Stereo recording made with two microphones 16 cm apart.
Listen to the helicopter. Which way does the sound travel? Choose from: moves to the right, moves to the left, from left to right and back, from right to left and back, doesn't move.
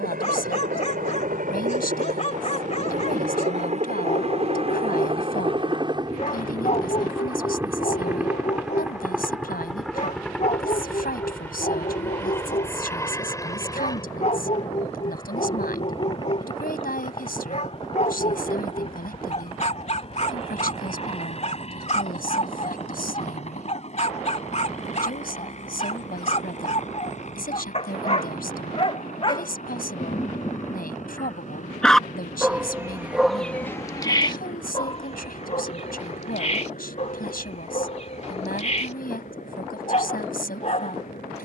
moves to the left.